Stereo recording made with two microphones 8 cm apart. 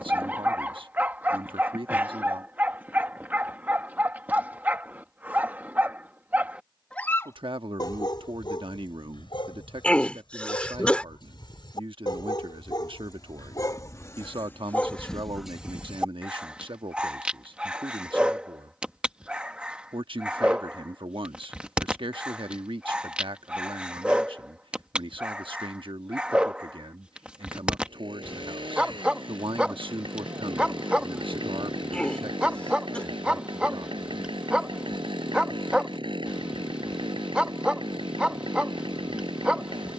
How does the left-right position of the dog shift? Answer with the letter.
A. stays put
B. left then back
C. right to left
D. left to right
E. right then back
B.